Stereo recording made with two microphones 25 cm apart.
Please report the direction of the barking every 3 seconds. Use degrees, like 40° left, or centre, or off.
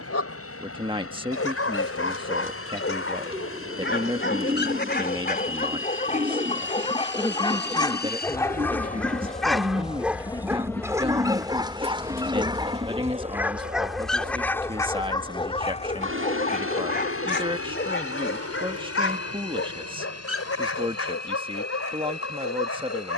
60° left, 40° left, 20° left, 10° right, 10° right, 30° left, 60° left, 70° left.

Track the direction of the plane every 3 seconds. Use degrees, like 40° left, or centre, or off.
70° left, 60° left, 50° left, 10° left, 30° right, 50° right, 60° right, 70° right.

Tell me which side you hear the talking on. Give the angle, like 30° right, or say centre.
20° right.